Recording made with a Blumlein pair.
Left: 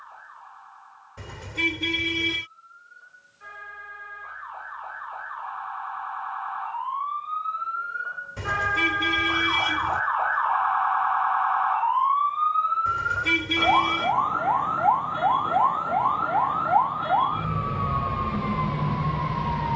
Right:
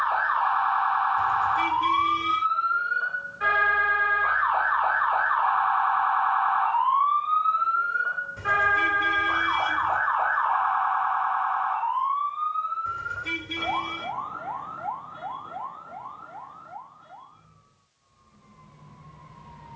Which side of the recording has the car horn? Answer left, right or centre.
left.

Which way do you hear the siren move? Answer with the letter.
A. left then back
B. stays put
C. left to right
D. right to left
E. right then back
D.